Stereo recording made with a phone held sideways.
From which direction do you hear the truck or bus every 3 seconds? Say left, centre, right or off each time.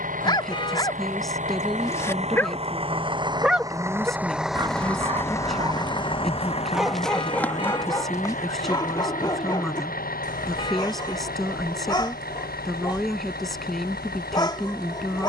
right, centre, left, left, left.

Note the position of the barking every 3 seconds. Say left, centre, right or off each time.
left, right, centre, left, left.